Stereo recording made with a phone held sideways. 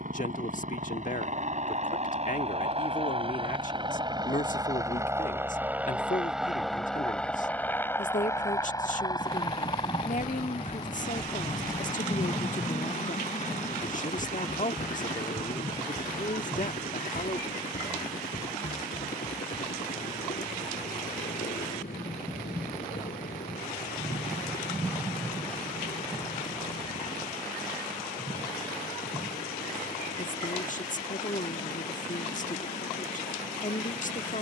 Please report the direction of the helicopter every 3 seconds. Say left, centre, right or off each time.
right, right, centre, left, left, left, left, left, left, left, left, left.